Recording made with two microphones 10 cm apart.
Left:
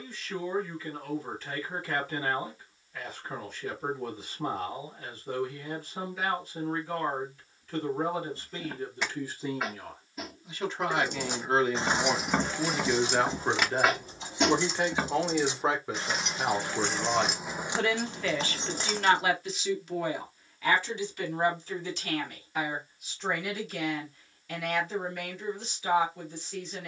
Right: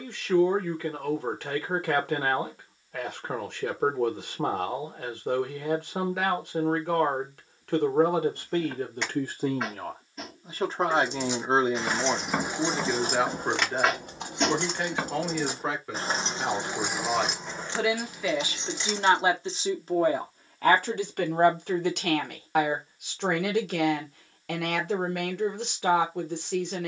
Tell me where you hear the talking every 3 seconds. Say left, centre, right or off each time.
right, right, right, right, centre, centre, right, right, right.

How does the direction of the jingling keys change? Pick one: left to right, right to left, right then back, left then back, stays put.
right then back.